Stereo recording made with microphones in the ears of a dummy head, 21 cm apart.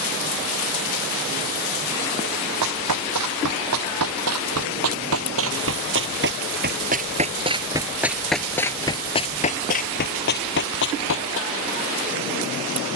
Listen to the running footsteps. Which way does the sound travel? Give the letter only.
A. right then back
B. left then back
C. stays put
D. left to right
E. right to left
E.